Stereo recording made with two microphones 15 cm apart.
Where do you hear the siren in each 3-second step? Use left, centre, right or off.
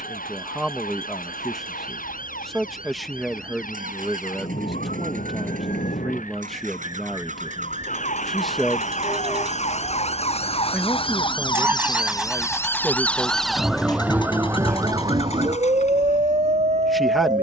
left, left, left, left, centre, right.